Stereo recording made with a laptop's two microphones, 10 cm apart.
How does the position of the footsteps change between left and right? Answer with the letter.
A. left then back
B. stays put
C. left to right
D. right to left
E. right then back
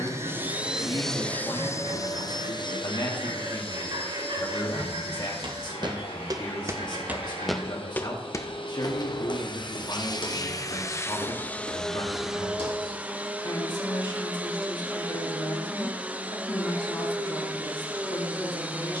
D.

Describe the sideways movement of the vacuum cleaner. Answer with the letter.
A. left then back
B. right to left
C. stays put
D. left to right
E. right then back
A.